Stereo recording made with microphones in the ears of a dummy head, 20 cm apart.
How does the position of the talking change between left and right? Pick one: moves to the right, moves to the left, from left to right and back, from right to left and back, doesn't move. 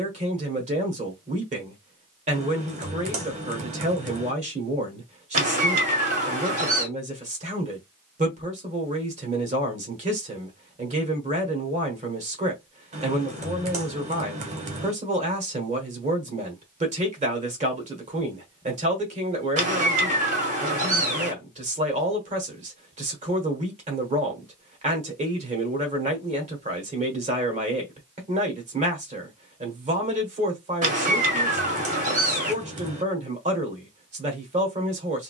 doesn't move.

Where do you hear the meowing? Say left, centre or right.
right.